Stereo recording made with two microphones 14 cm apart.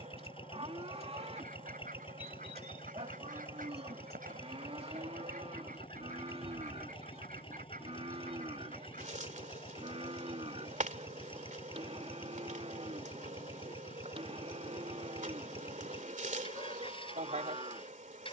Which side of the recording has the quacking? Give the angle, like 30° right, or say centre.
80° right.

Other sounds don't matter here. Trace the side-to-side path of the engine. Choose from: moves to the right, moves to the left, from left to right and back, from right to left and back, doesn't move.
doesn't move.